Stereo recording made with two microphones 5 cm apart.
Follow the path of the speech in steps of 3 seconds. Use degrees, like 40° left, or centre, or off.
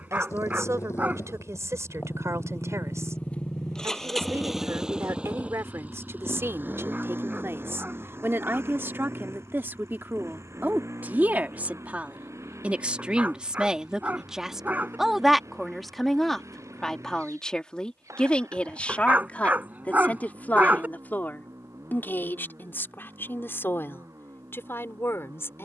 70° right, 60° right, 50° right, 40° right, 10° right, 10° left, 30° left, 40° left, 50° left.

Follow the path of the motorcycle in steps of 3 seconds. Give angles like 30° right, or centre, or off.
50° left, centre, 40° right, 60° right, 60° right, 70° right, 70° right, 70° right, 70° right.